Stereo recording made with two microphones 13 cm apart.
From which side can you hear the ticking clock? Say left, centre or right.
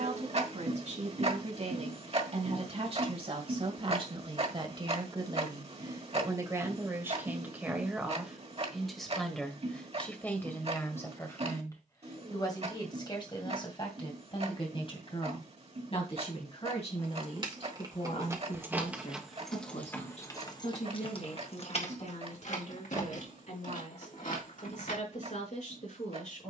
right.